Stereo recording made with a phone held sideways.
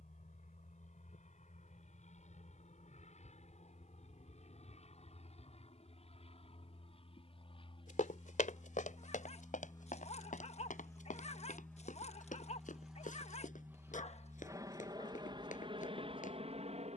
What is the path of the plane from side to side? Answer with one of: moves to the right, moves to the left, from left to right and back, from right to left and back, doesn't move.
moves to the right.